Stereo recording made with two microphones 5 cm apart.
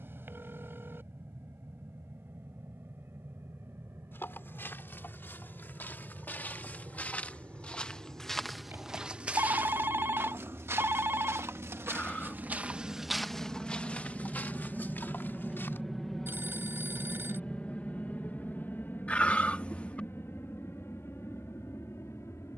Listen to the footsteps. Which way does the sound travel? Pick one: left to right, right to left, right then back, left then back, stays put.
right then back.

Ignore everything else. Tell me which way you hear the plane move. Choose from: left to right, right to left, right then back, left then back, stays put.
right to left.